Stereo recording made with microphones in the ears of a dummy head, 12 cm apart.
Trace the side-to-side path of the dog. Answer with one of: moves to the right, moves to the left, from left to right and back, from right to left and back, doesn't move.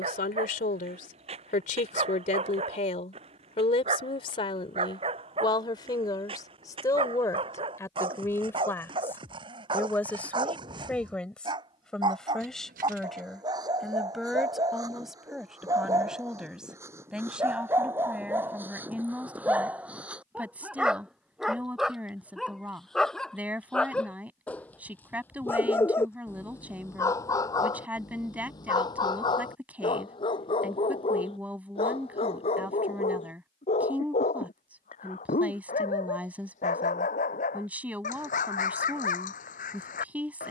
moves to the left.